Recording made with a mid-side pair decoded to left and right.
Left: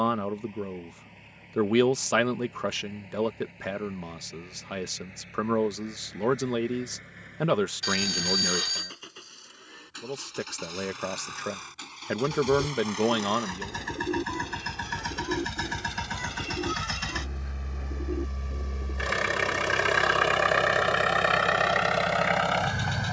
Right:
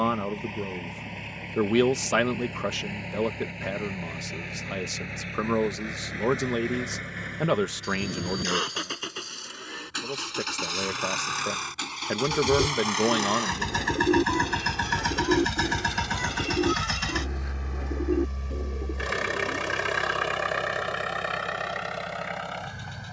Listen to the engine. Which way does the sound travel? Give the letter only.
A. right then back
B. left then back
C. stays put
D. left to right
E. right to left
E.